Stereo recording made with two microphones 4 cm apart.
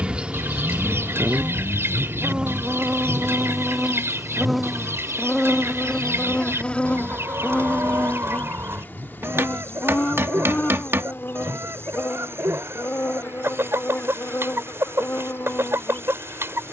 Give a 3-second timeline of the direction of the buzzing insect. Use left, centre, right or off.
right, centre, left, left, left, left.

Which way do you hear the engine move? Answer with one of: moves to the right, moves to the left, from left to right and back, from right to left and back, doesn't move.
moves to the right.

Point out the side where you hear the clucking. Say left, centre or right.
right.